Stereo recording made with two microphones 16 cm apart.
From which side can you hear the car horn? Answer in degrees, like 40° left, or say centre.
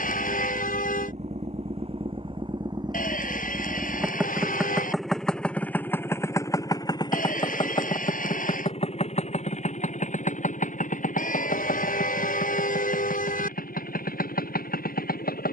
70° left.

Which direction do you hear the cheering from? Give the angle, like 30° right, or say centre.
60° left.